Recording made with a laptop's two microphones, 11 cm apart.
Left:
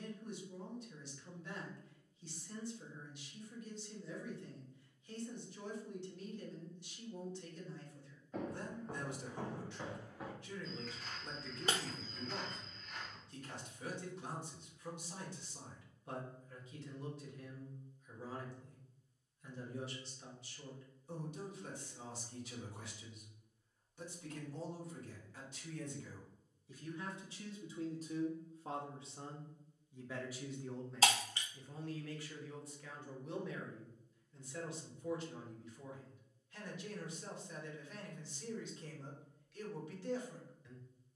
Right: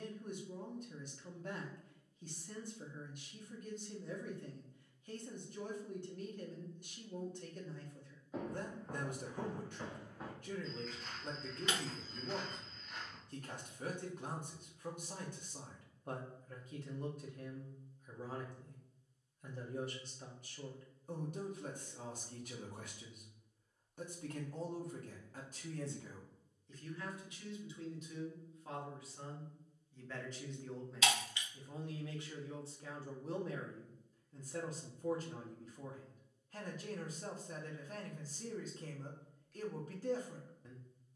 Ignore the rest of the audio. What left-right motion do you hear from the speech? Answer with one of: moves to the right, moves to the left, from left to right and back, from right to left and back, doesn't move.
from right to left and back.